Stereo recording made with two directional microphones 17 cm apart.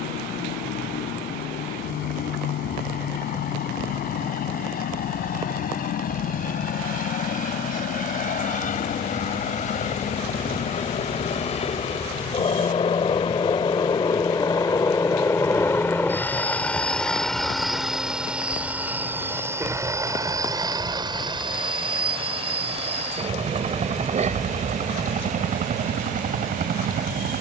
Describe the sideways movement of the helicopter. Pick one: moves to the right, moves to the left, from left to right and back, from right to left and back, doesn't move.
moves to the right.